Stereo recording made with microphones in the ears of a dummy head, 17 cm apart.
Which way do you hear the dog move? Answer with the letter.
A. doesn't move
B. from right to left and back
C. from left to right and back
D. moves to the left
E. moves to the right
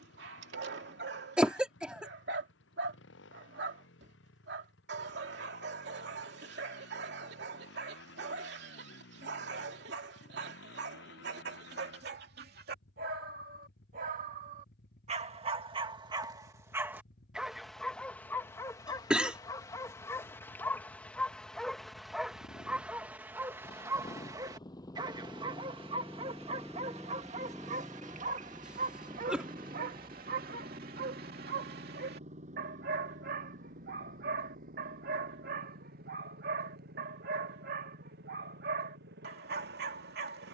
B.